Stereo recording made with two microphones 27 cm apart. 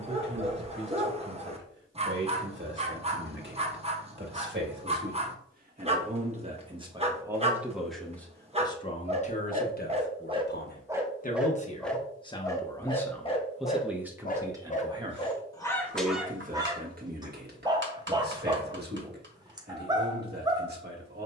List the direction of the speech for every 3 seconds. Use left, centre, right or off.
right, right, centre, left, centre, right, right.